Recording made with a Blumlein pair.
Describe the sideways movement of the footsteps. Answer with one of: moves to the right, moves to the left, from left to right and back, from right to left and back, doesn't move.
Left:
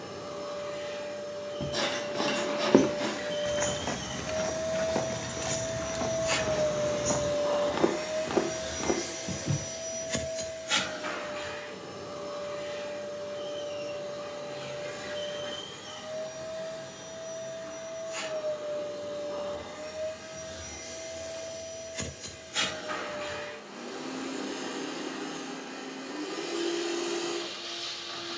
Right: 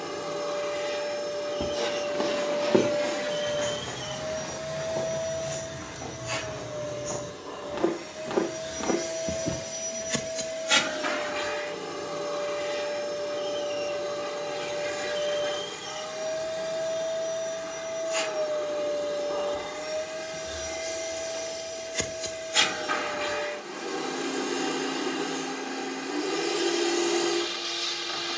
from right to left and back.